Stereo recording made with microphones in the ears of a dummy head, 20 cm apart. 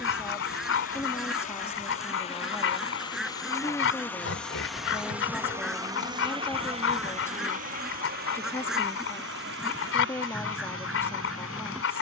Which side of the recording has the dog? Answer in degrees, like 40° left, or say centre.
60° left.